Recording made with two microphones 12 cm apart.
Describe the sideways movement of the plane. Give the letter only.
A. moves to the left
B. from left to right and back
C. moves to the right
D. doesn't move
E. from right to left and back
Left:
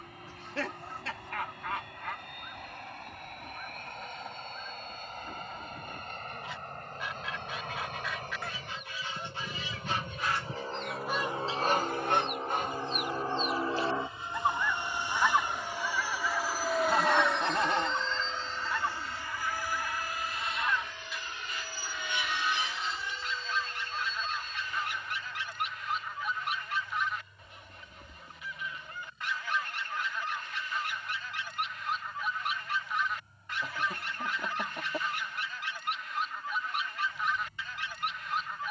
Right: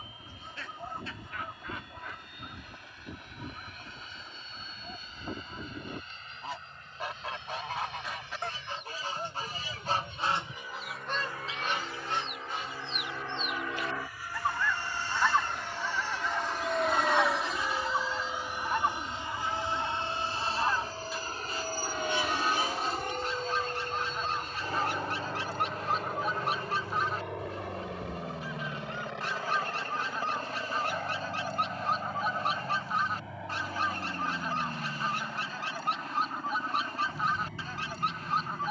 C.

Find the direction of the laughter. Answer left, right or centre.
left.